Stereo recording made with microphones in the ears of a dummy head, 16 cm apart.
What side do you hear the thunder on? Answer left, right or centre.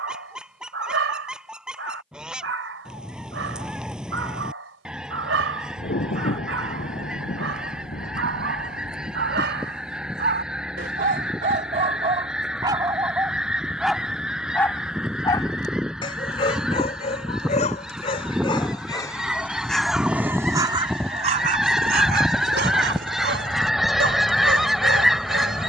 left.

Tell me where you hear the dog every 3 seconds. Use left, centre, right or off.
right, right, right, right, centre, left, centre, right, right.